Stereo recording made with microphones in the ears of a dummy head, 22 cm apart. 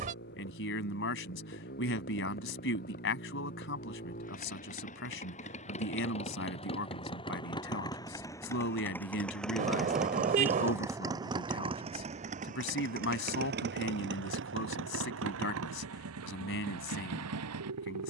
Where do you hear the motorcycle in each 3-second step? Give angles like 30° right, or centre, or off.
50° left, 40° left, 20° left, 10° right, 50° right, 70° right.